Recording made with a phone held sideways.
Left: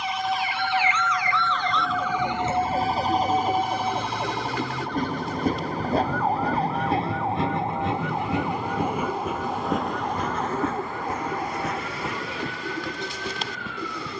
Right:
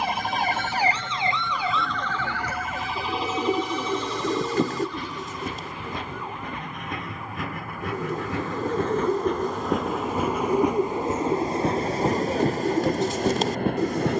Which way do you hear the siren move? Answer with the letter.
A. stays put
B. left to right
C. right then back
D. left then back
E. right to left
E.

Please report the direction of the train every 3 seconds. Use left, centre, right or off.
left, left, left, centre, right.